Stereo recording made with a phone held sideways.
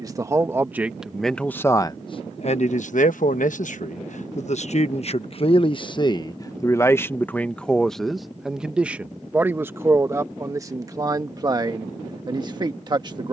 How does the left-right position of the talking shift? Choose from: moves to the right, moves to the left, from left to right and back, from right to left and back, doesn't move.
from right to left and back.